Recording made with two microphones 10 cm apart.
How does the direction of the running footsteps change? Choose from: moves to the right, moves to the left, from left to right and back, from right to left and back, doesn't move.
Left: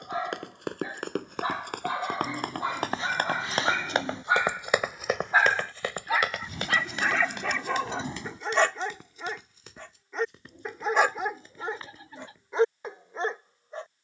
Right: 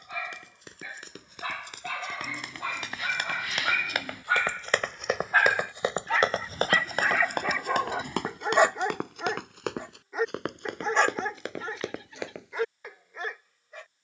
moves to the right.